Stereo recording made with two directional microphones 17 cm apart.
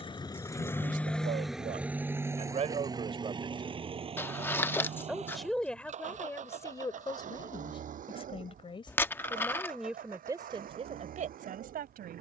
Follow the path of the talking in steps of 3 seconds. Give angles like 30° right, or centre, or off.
40° right, 10° right, 20° left, 30° right.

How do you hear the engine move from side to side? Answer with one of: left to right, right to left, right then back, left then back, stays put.
left to right.